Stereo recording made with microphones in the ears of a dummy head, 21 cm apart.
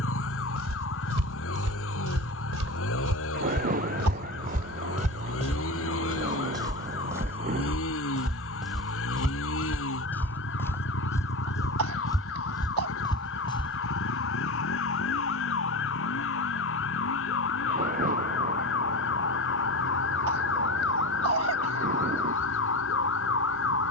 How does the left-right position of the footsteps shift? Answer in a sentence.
In this clip you hear the footsteps travel towards the left.